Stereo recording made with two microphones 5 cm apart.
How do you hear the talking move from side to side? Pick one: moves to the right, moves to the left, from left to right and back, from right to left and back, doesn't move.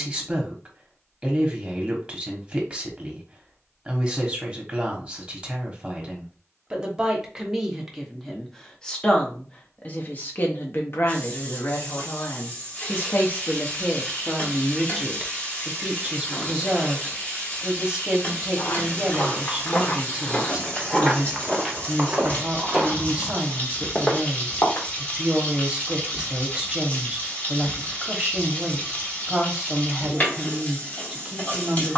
from right to left and back.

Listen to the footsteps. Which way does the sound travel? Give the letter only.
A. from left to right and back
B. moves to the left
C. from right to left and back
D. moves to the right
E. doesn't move
A.